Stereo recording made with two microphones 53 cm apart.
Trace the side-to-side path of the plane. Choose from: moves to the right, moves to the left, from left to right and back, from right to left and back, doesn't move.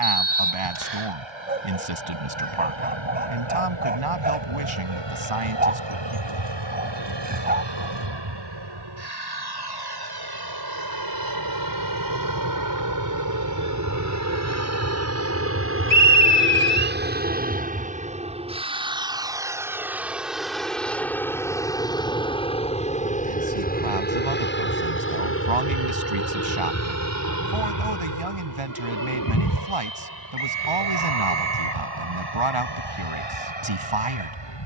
moves to the left.